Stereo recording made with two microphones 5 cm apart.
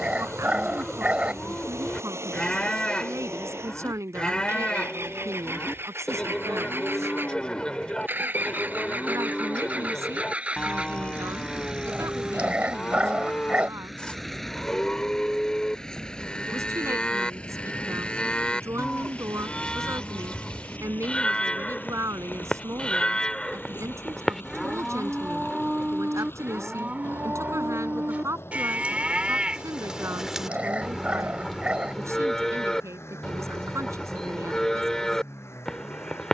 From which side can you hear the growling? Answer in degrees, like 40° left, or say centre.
30° right.